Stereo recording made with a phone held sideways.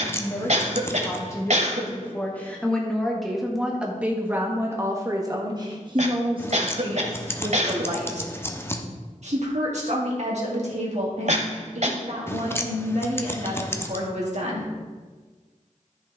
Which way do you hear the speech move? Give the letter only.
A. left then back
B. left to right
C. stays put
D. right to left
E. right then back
B.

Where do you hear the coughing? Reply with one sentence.
In this clip you hear the coughing on the right.